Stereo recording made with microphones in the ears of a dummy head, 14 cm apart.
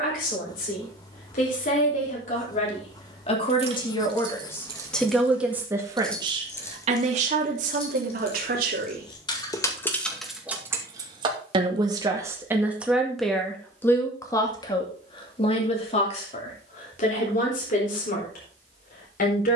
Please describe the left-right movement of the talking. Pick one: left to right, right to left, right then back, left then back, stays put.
right then back.